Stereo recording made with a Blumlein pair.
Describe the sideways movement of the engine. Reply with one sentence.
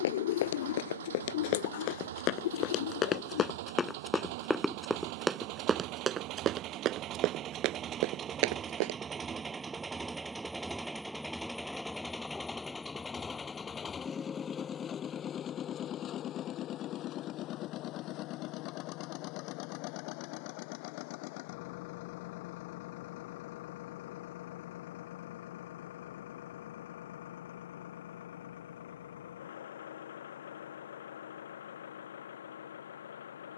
You can hear the engine go from the right side to the left.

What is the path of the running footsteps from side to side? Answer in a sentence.
In this clip you hear the running footsteps go from the left side to the right.